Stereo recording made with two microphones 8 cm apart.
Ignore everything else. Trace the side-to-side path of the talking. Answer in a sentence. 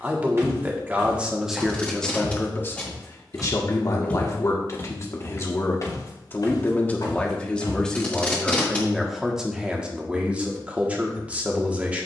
You can hear the talking move from right to left and back again.